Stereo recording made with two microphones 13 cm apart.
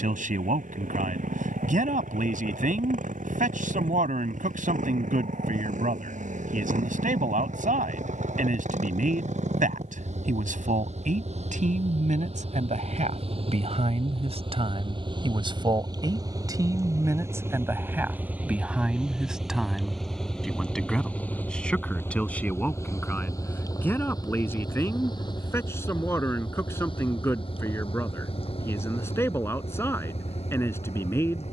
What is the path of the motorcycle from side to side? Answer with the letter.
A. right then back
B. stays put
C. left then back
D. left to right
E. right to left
E.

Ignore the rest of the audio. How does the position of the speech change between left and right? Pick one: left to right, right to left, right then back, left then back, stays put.
right to left.